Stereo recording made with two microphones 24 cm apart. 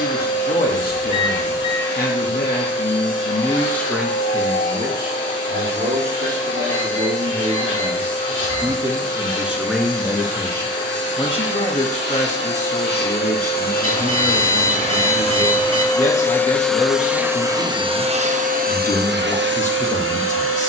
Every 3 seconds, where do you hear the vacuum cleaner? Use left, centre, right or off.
left, left, left, left, left, centre, right.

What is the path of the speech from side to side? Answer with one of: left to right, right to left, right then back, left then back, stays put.
right then back.